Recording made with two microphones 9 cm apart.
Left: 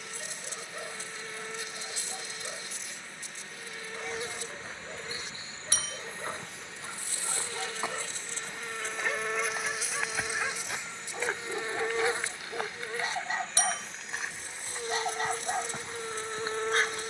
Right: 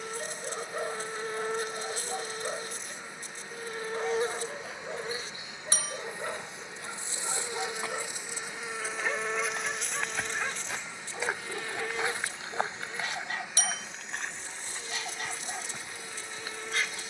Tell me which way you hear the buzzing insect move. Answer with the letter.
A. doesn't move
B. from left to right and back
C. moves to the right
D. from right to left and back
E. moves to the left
E.